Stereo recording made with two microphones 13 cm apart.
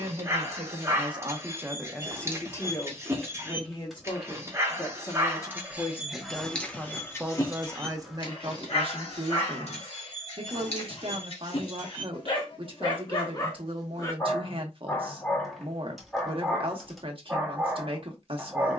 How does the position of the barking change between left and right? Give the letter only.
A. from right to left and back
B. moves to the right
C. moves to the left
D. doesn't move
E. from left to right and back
A.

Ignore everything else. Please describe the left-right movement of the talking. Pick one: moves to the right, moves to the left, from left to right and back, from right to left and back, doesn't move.
from right to left and back.